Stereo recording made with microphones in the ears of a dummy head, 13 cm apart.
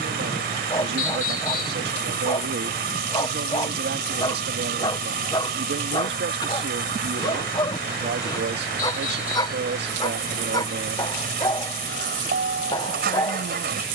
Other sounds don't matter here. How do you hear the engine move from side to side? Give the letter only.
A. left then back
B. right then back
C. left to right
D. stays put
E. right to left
D.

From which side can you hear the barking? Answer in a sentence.
In this clip you hear the barking on the left.